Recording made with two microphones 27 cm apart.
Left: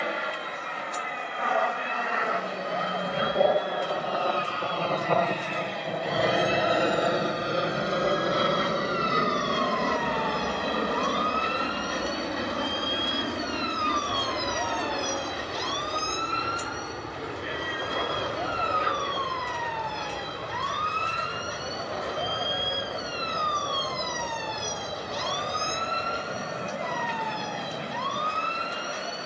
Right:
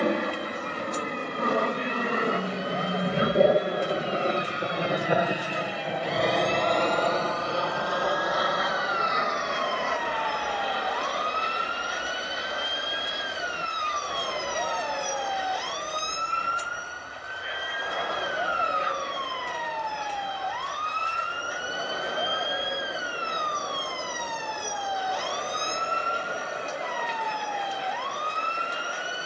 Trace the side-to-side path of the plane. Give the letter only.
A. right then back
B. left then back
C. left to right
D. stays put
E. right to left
E.